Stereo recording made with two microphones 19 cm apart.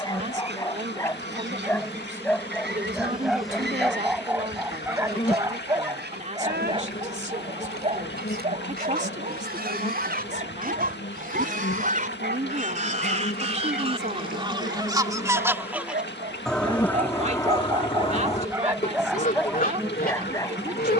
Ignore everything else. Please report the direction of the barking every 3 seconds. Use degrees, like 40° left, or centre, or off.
10° left, 10° right, 30° right, 50° right, 60° right, 40° right, centre.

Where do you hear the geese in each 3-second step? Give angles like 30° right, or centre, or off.
70° right, 70° right, 60° right, 50° right, 30° right, centre, 50° left.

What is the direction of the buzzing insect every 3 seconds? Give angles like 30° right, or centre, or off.
20° right, 10° left, 60° left, 70° left, 60° left, 30° left, 10° right.